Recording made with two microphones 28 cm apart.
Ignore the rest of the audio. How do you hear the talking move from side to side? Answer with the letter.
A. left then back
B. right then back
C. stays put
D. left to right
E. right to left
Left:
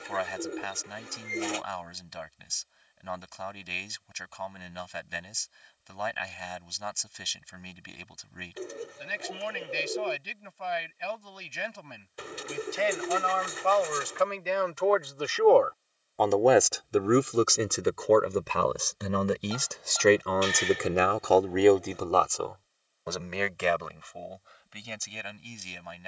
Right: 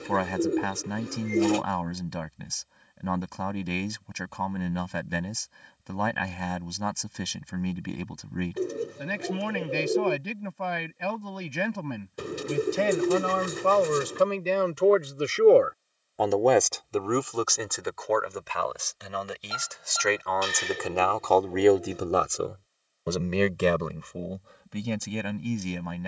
A.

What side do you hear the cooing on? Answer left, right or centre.
right.